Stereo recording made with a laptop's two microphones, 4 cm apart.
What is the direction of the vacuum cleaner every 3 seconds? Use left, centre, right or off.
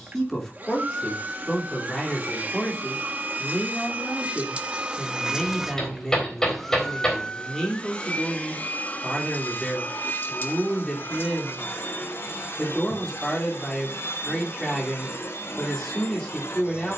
right, right, left, left, left, left.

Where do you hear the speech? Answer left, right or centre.
centre.